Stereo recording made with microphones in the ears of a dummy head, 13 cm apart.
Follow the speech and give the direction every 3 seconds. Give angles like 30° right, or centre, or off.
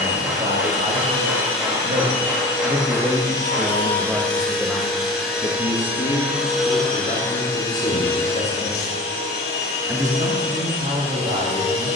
50° right, centre, 50° left, 30° right.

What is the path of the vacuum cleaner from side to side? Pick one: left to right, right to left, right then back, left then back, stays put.
right then back.